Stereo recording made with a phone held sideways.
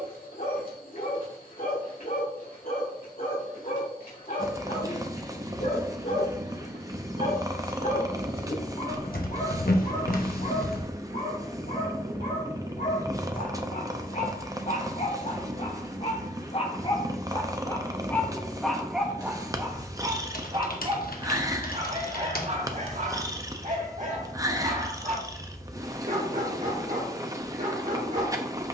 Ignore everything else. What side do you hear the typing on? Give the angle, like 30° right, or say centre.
80° left.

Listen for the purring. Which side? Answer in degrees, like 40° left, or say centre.
20° right.